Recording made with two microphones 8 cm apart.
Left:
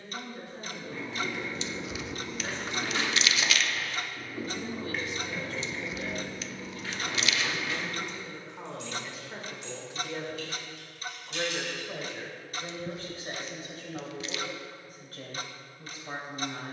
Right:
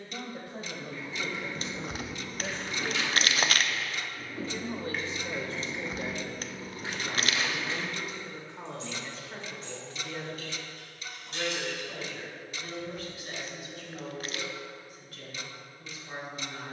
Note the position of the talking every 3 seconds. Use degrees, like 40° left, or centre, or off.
60° right, 40° right, 10° right, 10° left, 30° left, 40° left.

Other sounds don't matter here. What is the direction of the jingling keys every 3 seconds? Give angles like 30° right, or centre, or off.
60° left, 10° left, 30° right, 40° right, off, off.